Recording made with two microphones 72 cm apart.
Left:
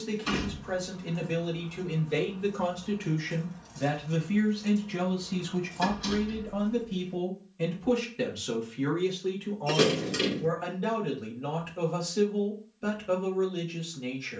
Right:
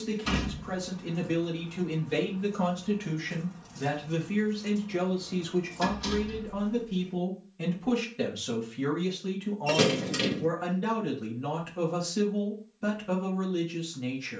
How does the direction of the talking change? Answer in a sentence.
In this clip you hear the talking go left and come back.